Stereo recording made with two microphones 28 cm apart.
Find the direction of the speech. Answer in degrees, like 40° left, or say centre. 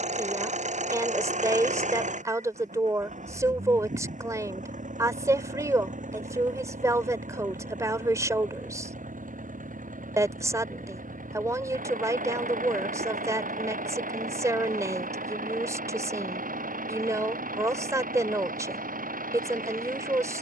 10° right.